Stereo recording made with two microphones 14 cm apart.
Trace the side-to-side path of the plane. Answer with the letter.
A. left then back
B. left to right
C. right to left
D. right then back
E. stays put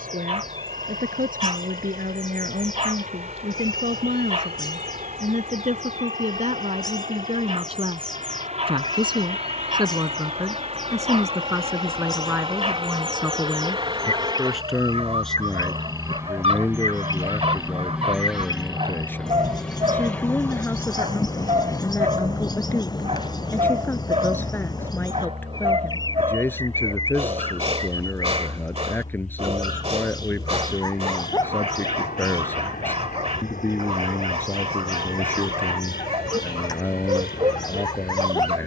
C.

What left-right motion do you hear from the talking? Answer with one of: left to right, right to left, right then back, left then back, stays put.
right to left.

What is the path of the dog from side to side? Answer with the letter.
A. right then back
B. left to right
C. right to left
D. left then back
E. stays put
E.